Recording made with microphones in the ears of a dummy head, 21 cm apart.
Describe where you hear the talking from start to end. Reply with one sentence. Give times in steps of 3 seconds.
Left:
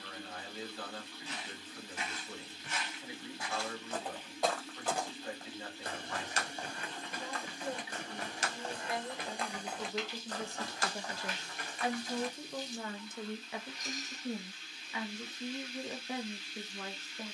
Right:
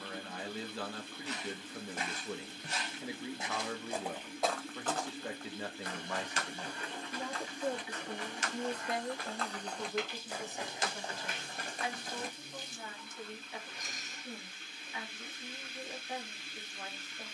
In this clip you hear the talking on the right from 0 s, in the centre from 9 s and on the left from 12 s.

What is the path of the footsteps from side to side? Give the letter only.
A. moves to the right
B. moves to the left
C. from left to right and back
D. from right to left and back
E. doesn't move
D.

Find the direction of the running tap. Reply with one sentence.
In this clip you hear the running tap on the right.